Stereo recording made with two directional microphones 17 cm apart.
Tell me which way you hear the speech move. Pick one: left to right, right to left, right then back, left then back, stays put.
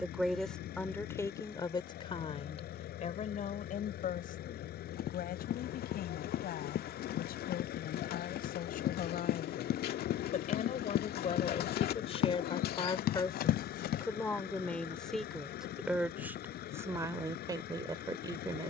left then back.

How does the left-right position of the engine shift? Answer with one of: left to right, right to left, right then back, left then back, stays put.
stays put.